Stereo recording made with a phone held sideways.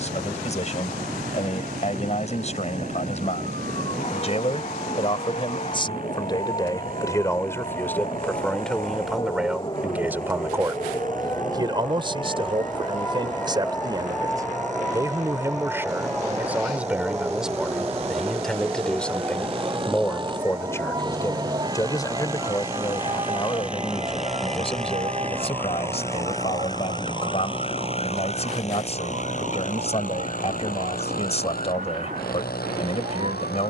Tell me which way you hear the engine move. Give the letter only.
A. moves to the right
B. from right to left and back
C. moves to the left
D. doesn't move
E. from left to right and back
C.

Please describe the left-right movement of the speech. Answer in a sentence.
In this clip you hear the speech move from left to right and back again.